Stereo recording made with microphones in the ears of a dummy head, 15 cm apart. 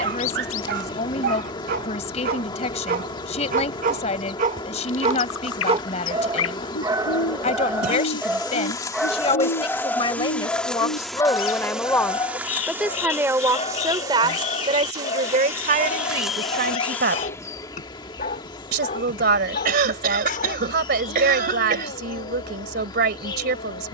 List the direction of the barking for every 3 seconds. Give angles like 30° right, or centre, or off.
60° right, 50° right, 20° right, 10° left, 30° left, 40° left, 50° left, 60° left.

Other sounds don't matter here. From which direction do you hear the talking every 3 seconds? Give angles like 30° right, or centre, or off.
40° left, 40° left, 40° left, 20° left, 20° right, 50° right, 60° right, 60° right.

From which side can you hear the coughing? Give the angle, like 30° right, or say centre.
60° right.